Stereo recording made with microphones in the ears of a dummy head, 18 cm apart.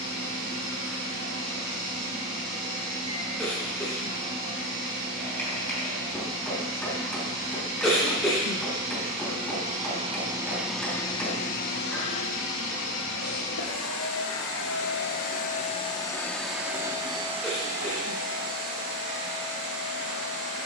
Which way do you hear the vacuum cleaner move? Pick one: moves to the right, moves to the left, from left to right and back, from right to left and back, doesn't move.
from right to left and back.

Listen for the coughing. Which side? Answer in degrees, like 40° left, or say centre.
centre.